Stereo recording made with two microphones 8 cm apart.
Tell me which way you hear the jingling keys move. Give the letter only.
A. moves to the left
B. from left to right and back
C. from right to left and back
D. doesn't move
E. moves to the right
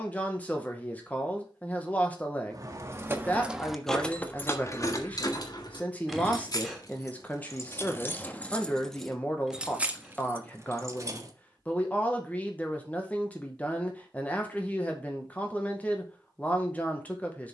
C.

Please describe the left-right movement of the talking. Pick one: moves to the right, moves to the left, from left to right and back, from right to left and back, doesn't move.
doesn't move.